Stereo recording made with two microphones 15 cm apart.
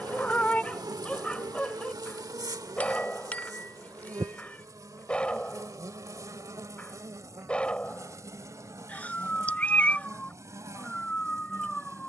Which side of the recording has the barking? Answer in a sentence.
You can hear the barking in the centre.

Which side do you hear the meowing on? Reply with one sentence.
In this clip you hear the meowing in the centre.